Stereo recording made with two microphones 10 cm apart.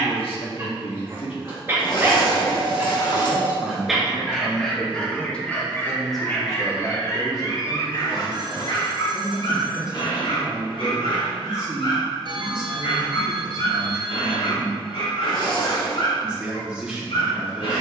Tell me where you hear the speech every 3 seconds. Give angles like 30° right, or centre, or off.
60° left, 20° left, 10° right, 10° right, 10° right, 10° right.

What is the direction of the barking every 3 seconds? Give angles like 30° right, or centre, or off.
20° right, 10° left, 40° left, 60° left, 70° left, 70° left.